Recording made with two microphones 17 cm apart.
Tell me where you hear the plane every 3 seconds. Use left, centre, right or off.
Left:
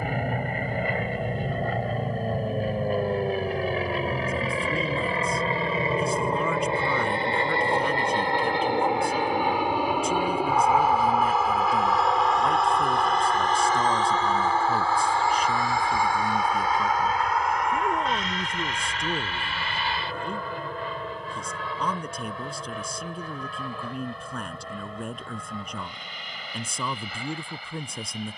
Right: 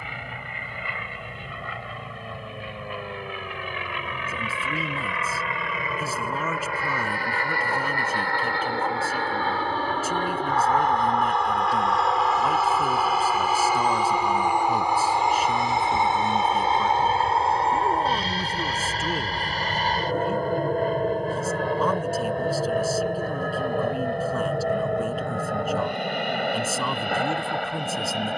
left, left, left, centre, centre, right, right, right, right, right.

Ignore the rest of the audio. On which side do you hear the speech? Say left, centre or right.
centre.